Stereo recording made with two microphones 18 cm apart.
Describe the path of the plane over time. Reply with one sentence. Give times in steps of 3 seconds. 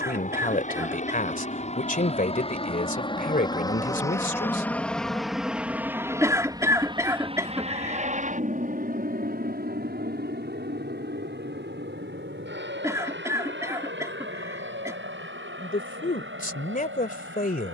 You can hear the plane on the left from 0 s, in the centre from 3 s and on the right from 6 s.